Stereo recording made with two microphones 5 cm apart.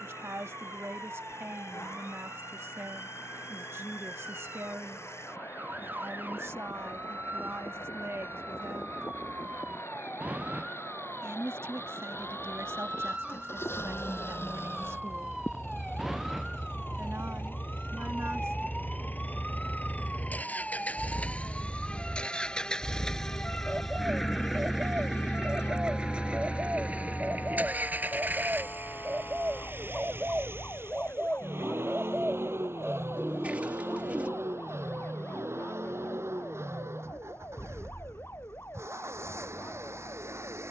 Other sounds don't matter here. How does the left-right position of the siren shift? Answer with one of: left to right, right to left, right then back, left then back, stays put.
right to left.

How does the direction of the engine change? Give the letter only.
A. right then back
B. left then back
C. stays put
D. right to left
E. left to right
E.